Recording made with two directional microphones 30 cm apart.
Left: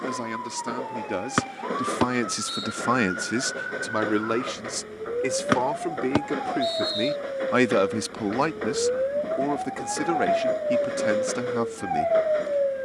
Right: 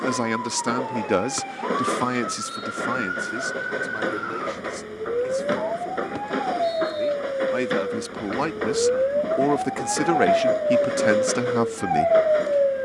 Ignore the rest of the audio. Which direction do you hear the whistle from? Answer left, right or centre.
left.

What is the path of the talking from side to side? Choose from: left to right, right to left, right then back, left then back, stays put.
left then back.